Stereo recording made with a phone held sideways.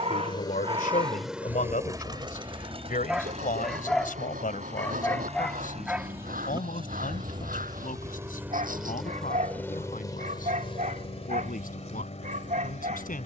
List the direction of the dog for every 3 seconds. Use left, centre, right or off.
right, centre, right, right, right.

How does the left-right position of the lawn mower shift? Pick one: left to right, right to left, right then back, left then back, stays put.
right then back.